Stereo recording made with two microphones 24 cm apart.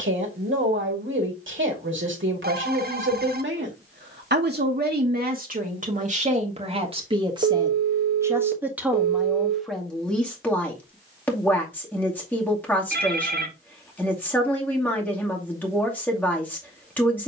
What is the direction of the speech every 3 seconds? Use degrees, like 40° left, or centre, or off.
60° right, 40° right, 20° right, centre, 10° left, 10° left.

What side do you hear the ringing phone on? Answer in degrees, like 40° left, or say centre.
40° right.